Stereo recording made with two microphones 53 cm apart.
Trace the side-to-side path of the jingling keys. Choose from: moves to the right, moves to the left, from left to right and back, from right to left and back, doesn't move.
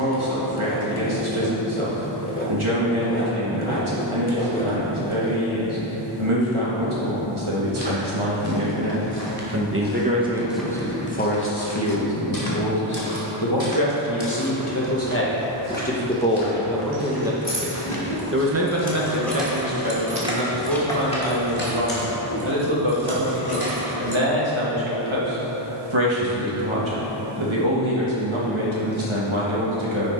from left to right and back.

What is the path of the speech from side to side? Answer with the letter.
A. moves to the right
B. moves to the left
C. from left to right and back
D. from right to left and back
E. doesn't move
D.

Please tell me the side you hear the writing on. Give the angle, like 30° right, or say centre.
20° left.